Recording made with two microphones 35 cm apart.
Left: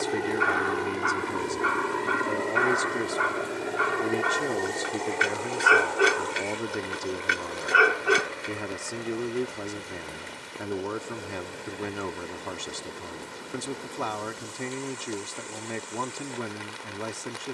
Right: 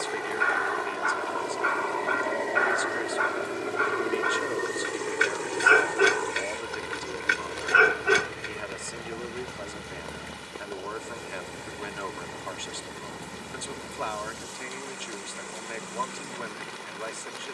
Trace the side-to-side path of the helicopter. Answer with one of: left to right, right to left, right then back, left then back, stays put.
left to right.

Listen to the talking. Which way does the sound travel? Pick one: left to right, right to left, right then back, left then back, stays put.
stays put.